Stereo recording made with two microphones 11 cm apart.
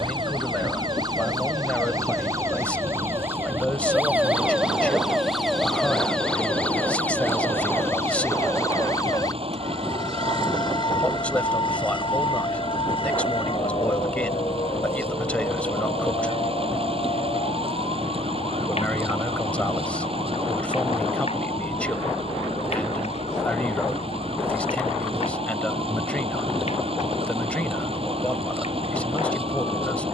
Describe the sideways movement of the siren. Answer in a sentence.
In this clip you hear the siren move from right to left.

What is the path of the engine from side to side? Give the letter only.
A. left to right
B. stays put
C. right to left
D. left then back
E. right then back
B.